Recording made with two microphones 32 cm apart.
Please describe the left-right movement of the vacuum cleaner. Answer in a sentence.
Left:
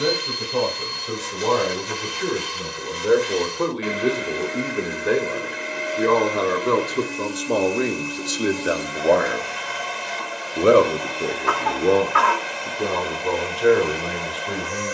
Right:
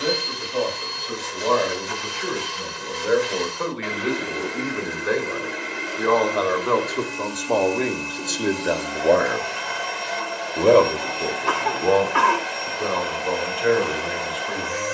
In this clip you hear the vacuum cleaner stay put.